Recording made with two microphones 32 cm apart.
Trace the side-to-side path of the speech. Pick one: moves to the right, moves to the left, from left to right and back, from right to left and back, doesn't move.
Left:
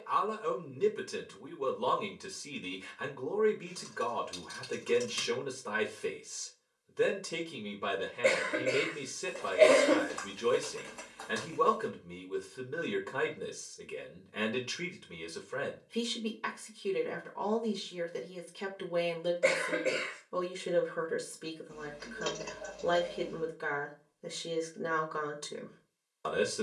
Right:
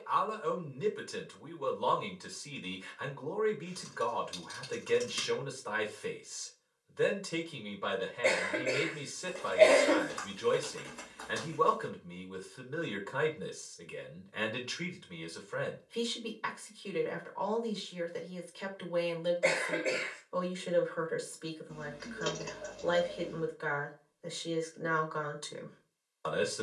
doesn't move.